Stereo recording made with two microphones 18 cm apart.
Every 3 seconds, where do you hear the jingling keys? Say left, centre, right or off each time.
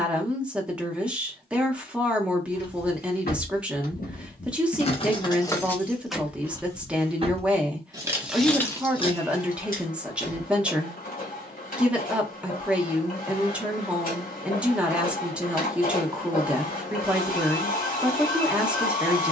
left, left, centre, left, off, off, off.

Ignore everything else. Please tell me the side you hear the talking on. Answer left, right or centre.
centre.